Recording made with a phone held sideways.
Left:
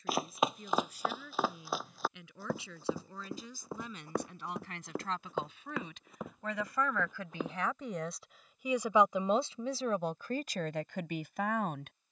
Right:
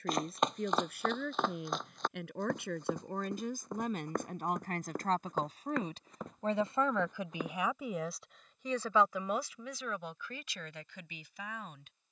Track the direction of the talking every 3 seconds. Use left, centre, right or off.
right, right, centre, left.